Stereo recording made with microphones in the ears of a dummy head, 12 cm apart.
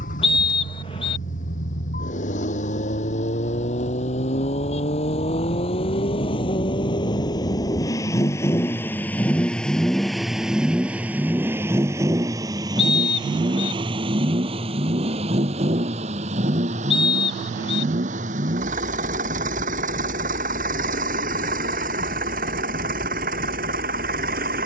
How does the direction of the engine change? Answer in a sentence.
You can hear the engine move to the right.